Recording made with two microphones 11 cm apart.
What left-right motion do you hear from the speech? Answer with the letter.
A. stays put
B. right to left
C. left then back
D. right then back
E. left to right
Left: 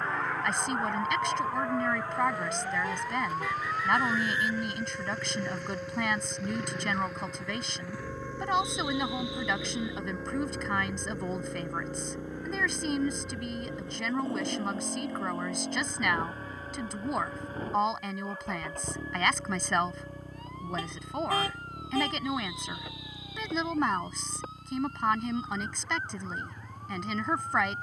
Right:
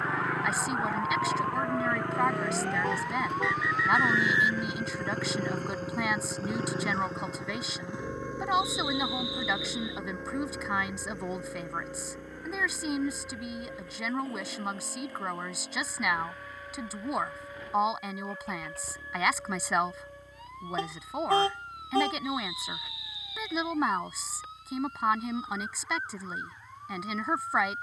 A.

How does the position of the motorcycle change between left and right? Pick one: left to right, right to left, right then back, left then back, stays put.
right to left.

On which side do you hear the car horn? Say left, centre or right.
right.